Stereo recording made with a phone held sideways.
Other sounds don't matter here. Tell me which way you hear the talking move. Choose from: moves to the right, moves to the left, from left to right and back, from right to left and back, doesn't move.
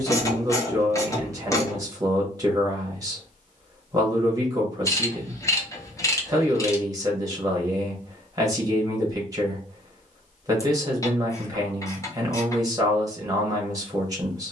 doesn't move.